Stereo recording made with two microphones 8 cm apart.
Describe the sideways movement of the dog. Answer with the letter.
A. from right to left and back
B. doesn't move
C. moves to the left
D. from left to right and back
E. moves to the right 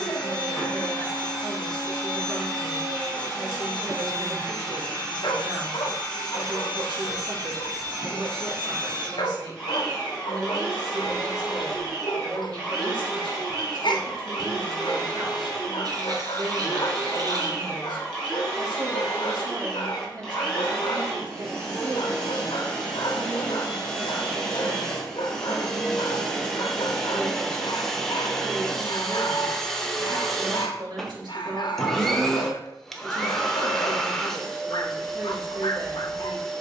B.